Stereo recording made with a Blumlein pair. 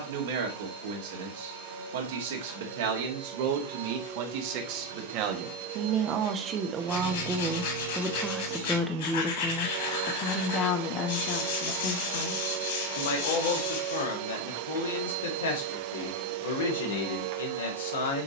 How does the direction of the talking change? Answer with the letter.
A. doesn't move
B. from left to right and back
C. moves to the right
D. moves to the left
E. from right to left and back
D.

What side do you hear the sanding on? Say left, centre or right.
left.